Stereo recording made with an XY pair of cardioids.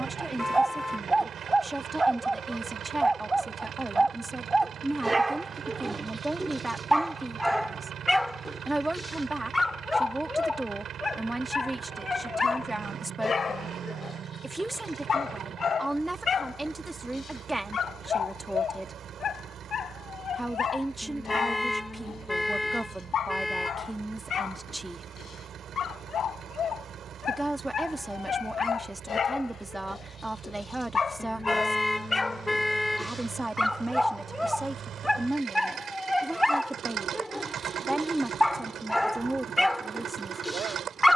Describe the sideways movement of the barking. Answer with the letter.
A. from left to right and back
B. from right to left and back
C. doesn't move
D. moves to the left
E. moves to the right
B.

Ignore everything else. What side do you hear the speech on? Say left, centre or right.
centre.